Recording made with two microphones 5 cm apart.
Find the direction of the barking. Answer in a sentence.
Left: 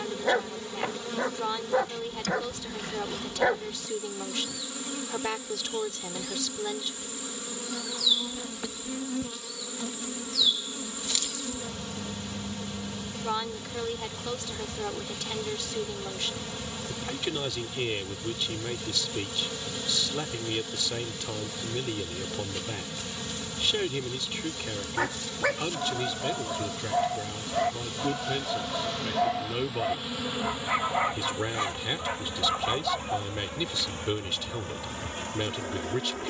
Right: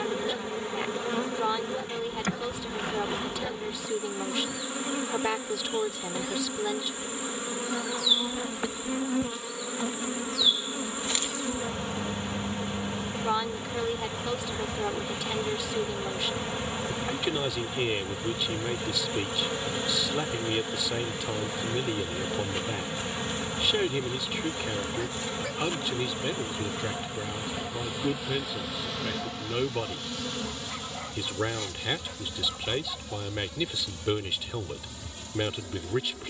In this clip you hear the barking on the left.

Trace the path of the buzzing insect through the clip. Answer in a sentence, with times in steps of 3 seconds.
In this clip you hear the buzzing insect on the right from 0 s, in the centre from 27 s and on the left from 30 s.